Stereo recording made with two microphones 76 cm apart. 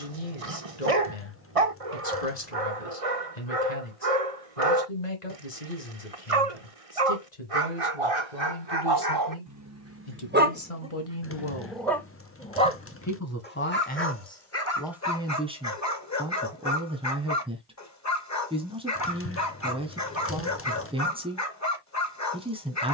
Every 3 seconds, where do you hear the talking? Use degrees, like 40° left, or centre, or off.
70° left, 70° left, 70° left, 50° left, 10° left, 10° right, 10° right, 10° right.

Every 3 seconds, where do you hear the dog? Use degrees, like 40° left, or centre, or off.
50° right, 50° right, 40° right, 10° right, 10° left, 20° left, 20° left, 20° left.